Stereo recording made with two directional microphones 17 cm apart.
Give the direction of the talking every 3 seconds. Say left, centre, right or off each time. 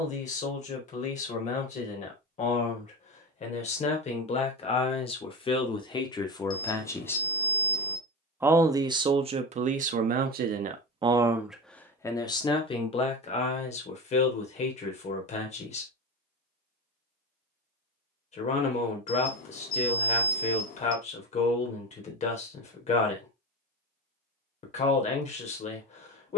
left, left, centre, right, left, left, left, left, left.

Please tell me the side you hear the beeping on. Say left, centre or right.
left.